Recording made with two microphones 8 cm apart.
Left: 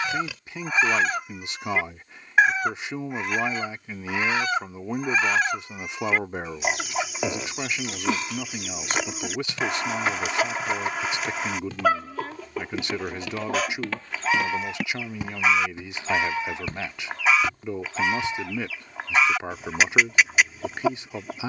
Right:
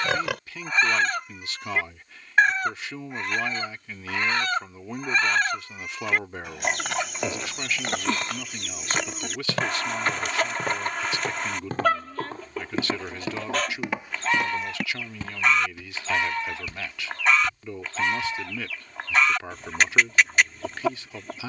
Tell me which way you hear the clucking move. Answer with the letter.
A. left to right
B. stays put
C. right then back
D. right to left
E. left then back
B.